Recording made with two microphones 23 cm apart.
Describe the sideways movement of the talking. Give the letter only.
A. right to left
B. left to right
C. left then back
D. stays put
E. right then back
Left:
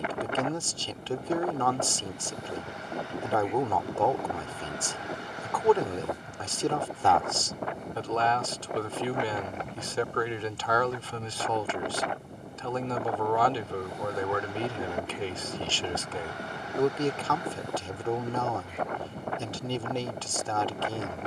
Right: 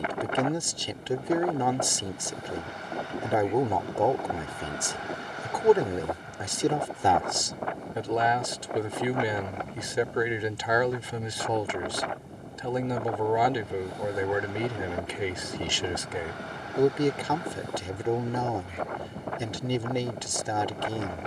D.